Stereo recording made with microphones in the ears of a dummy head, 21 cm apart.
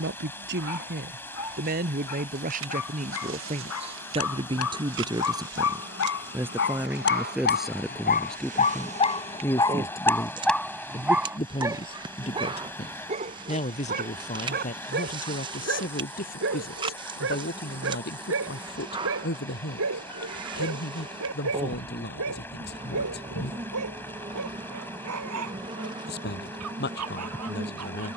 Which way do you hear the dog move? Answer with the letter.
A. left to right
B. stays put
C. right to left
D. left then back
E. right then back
A.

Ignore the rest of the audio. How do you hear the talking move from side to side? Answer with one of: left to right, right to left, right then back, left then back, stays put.
right to left.